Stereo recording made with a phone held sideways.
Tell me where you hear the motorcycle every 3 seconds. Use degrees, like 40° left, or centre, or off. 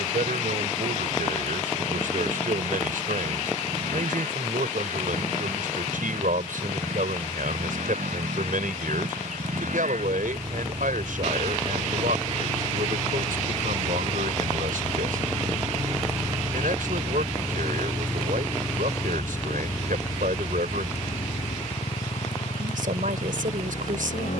80° right, 80° right, 70° right, 60° right, 50° right, 20° right, 20° left, 50° left.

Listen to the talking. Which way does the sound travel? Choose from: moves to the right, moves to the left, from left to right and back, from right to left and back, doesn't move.
doesn't move.